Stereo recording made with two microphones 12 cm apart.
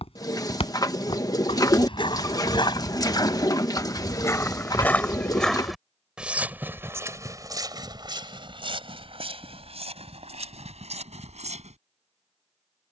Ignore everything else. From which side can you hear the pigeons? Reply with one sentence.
You can hear the pigeons on the left.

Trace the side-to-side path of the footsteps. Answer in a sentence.
You can hear the footsteps move to the right.